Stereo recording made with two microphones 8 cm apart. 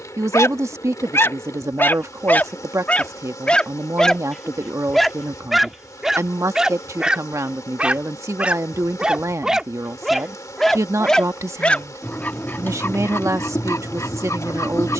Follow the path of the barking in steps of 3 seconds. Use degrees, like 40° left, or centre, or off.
30° left, 10° left, 10° right, centre, 30° left.